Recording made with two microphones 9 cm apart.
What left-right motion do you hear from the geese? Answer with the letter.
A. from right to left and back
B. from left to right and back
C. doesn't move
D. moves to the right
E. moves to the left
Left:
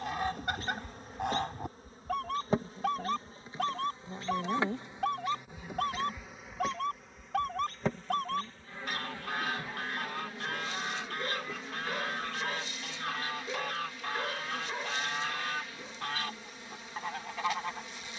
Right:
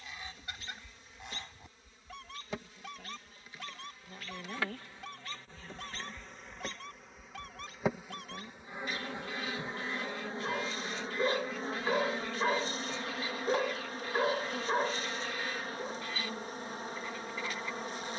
C.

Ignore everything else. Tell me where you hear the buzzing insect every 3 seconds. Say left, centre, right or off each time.
left, left, centre, right, right, right.